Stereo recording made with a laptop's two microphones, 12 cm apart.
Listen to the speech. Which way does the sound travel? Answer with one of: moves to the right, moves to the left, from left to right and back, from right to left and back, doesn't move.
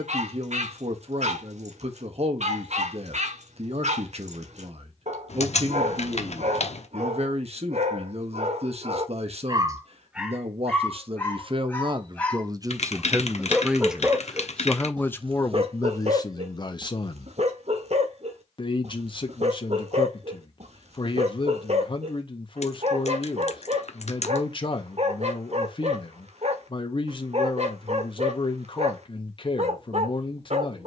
moves to the left.